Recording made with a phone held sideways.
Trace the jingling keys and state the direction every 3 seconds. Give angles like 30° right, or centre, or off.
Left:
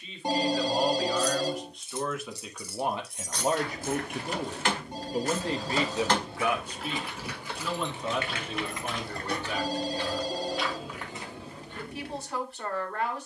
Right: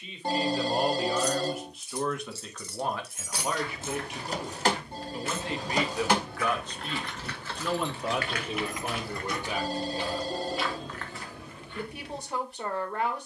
20° left, 20° right, 10° left, 30° left, off.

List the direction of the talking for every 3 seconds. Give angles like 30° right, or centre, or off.
10° right, 40° left, centre, 20° right, 20° right.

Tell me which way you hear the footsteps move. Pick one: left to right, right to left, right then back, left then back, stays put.
right then back.